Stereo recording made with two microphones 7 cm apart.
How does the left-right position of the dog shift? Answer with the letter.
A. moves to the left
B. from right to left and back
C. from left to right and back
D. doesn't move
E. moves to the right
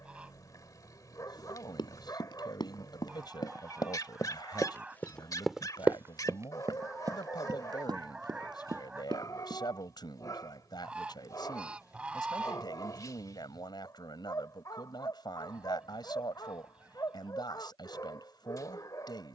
D.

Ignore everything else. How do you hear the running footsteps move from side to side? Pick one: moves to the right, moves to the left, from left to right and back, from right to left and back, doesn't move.
moves to the right.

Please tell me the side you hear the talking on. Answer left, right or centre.
left.